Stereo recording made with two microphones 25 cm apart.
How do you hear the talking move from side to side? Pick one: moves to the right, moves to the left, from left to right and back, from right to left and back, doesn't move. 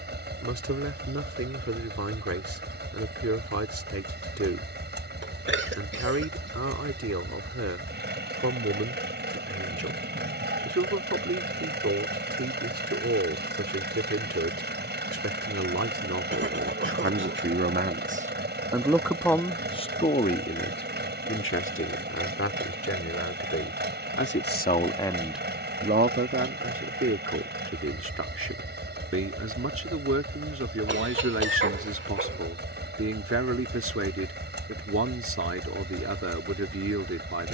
from right to left and back.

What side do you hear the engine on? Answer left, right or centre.
right.